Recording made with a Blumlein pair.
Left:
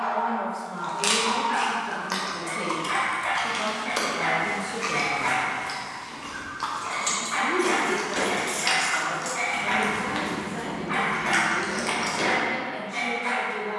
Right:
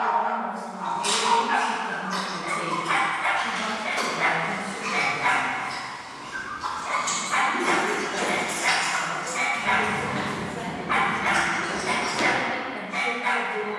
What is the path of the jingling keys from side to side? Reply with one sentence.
In this clip you hear the jingling keys go from the left side to the right.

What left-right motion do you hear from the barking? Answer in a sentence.
You can hear the barking stay put.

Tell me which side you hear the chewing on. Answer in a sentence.
You can hear the chewing on the left.